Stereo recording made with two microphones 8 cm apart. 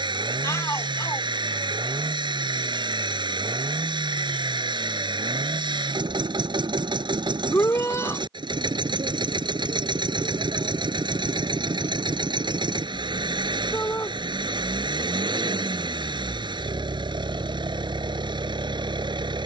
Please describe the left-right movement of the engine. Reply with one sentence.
You can hear the engine stay in one place.